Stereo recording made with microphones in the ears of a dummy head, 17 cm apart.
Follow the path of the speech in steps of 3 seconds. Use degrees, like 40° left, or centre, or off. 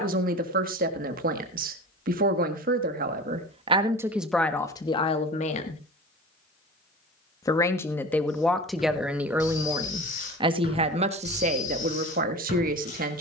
50° right, centre, 10° left, 30° right, 50° right.